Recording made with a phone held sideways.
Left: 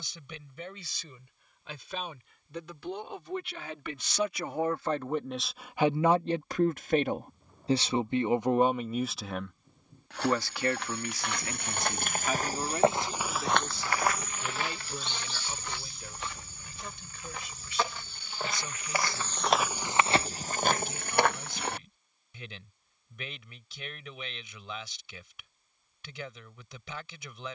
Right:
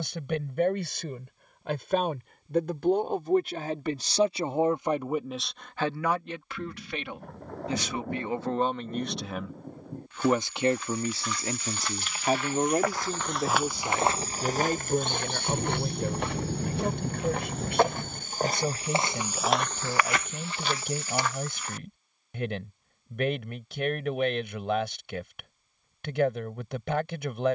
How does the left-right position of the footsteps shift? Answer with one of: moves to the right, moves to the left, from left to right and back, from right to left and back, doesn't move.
from left to right and back.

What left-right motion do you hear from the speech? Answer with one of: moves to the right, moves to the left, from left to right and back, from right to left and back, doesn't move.
from right to left and back.